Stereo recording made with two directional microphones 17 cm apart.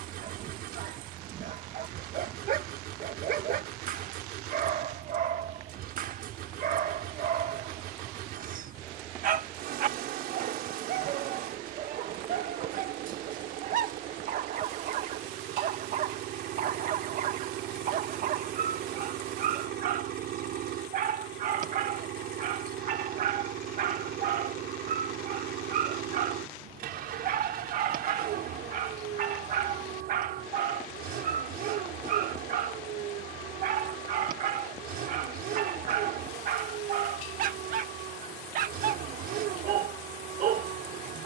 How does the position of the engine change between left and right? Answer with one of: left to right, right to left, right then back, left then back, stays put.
stays put.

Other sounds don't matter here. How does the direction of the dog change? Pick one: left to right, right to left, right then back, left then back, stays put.
stays put.